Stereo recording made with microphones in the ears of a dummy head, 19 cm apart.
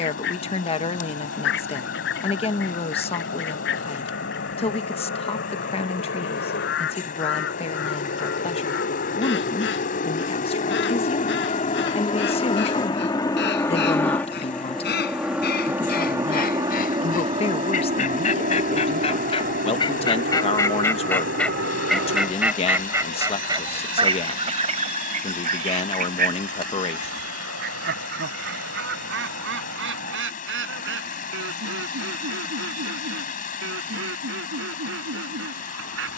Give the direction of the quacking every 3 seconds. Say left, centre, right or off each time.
left, left, left, left, left, left, left, centre, right, right, right, right.